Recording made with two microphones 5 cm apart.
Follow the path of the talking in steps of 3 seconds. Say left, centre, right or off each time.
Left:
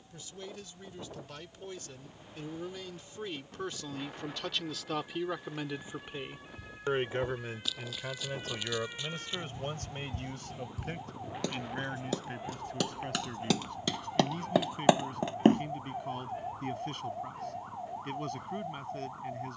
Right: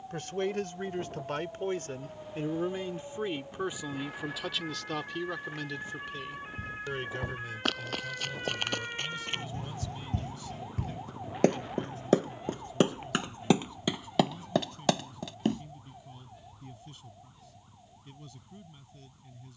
right, centre, left, left, left, left, left.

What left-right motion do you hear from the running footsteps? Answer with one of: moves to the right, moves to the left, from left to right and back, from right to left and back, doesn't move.
moves to the left.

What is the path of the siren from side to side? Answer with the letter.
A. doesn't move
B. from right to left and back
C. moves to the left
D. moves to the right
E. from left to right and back
C.